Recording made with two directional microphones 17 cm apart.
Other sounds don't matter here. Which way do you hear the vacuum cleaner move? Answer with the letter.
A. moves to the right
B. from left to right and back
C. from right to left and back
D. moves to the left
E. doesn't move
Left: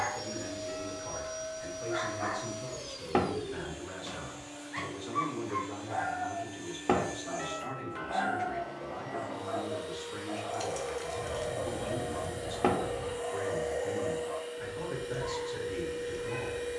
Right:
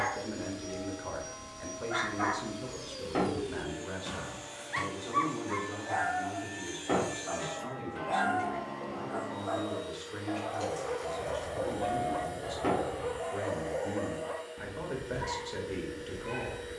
B.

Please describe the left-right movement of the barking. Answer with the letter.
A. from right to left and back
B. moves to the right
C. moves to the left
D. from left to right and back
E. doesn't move
E.